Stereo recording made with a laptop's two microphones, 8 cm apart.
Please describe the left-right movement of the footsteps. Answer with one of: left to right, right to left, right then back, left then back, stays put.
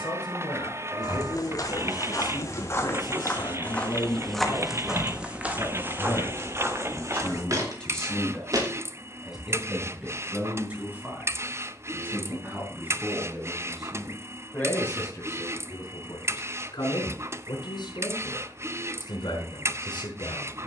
left to right.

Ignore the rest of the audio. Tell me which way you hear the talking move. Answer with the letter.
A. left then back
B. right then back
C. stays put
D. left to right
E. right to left
B.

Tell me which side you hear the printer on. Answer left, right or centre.
right.